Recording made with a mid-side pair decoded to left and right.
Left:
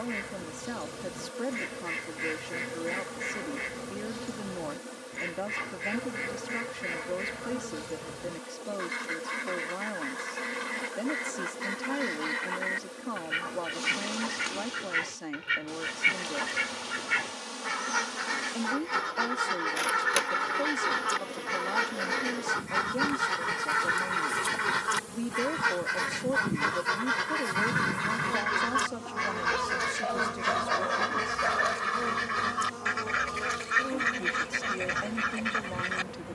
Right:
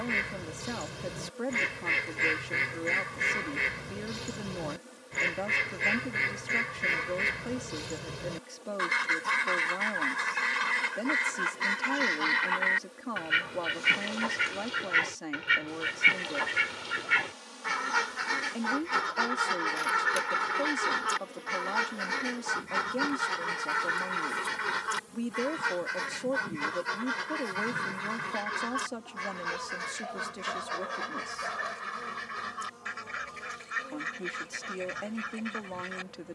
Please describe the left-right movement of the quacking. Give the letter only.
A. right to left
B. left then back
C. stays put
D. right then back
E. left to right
A.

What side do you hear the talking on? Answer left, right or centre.
centre.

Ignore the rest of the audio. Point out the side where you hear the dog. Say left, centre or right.
left.